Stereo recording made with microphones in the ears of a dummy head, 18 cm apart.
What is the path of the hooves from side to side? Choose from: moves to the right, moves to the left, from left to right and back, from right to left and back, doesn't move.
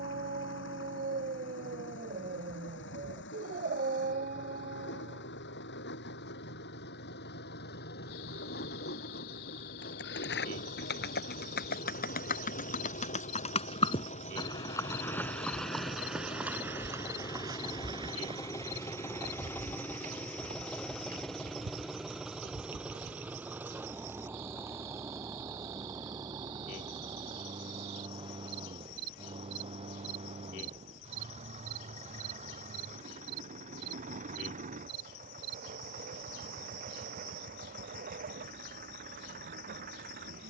moves to the right.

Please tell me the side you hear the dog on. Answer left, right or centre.
right.